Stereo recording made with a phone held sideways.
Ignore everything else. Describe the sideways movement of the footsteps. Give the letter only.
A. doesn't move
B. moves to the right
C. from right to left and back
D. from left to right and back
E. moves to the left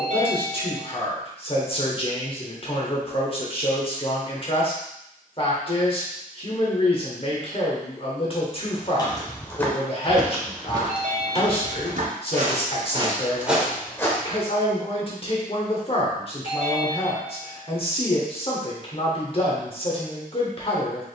D.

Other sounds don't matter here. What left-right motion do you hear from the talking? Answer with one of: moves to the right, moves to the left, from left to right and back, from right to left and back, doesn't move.
doesn't move.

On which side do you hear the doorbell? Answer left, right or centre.
right.